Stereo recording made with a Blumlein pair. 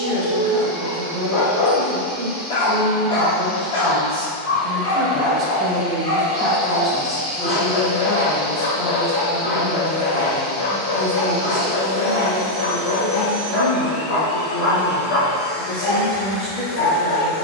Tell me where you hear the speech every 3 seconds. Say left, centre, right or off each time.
right, right, centre, left, left, left.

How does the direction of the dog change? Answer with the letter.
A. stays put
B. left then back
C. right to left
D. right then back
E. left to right
A.